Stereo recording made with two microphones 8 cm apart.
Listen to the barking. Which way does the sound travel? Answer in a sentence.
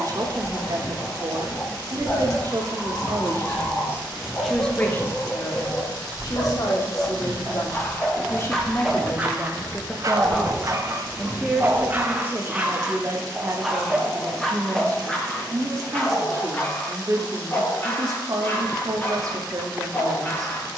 In this clip you hear the barking go right and come back.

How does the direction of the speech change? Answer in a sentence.
In this clip you hear the speech move from right to left and back again.